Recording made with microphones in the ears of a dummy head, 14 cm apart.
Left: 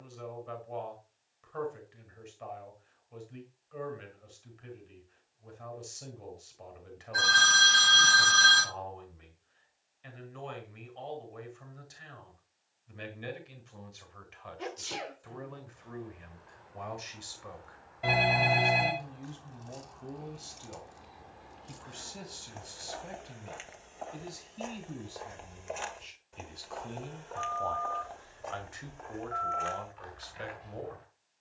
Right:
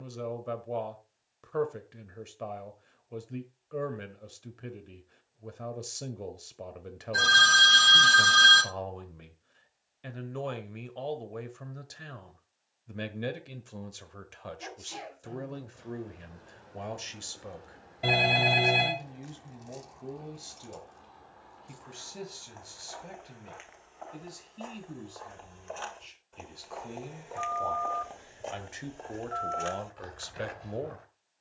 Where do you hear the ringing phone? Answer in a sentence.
You can hear the ringing phone on the right.